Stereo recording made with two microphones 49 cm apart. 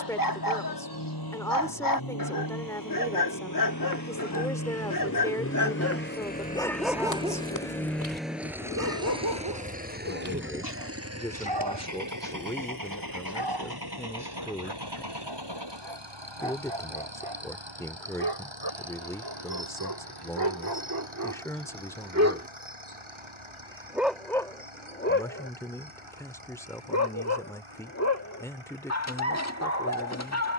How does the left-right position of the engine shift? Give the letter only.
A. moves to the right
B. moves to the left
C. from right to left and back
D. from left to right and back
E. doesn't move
A.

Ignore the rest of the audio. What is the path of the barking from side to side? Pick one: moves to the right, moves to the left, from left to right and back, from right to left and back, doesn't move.
from left to right and back.